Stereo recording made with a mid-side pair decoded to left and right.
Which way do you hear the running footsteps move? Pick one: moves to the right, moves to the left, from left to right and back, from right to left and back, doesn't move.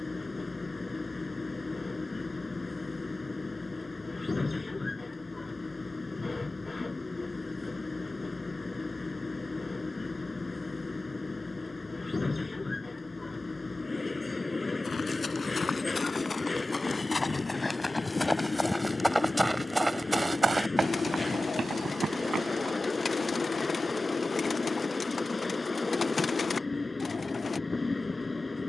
moves to the right.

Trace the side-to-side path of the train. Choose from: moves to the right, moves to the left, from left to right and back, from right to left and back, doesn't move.
doesn't move.